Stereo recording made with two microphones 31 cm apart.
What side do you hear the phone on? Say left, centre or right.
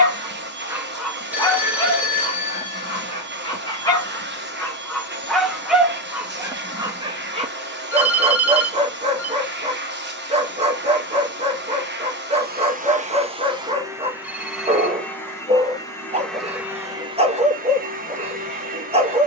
centre.